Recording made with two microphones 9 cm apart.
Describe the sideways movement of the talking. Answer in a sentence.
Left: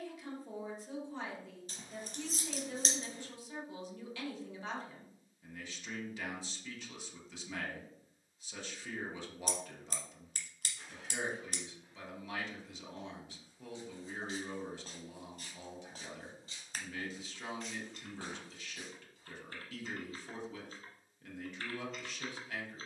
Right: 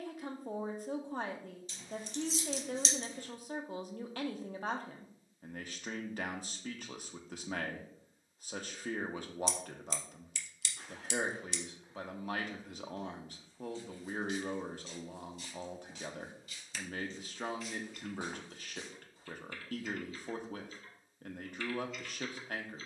You can hear the talking stay put.